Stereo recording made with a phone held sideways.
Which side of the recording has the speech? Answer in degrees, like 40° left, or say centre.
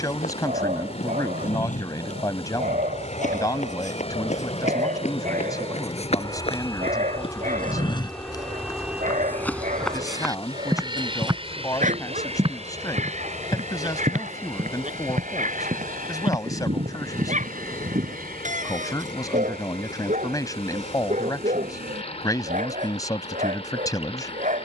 30° left.